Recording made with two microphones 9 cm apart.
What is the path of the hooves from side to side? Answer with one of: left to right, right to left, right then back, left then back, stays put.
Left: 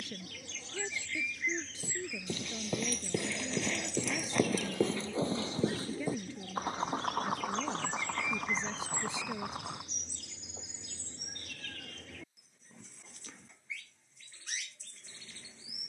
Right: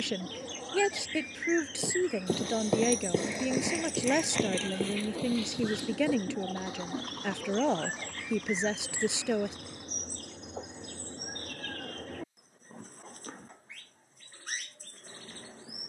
right to left.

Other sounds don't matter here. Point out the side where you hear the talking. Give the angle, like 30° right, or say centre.
80° right.